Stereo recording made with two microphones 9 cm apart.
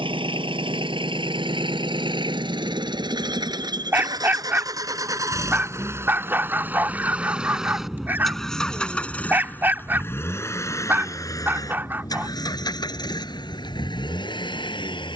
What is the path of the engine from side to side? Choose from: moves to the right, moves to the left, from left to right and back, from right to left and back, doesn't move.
moves to the left.